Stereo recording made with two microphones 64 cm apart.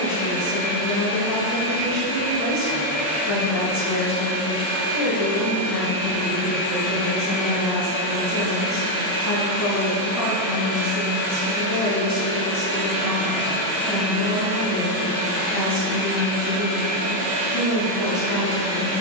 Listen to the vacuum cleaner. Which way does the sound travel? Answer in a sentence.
You can hear the vacuum cleaner go from the left side to the right.